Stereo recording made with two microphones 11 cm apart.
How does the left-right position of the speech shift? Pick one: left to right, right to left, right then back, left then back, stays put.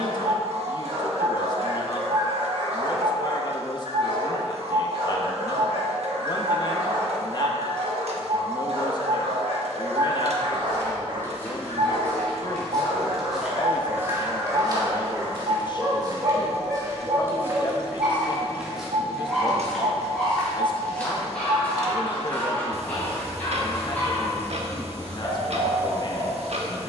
stays put.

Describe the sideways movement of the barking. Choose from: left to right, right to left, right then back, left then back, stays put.
right to left.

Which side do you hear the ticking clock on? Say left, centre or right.
right.